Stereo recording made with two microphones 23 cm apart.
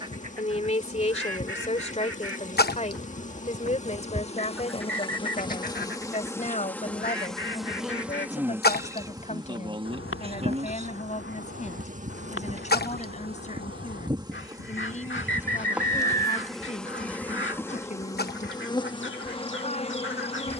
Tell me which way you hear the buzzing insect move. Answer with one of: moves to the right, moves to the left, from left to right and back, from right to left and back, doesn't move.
from left to right and back.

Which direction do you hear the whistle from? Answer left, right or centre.
right.